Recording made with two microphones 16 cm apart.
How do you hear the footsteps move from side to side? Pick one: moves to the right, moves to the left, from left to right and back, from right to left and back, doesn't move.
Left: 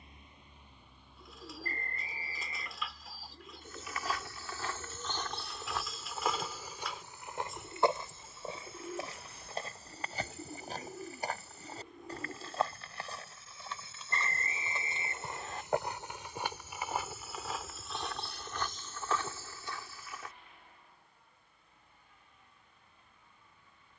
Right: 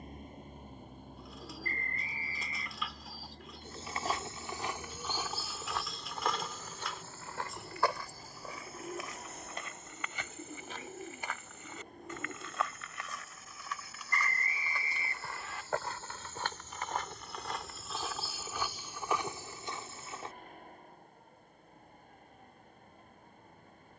from right to left and back.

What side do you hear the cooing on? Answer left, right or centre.
centre.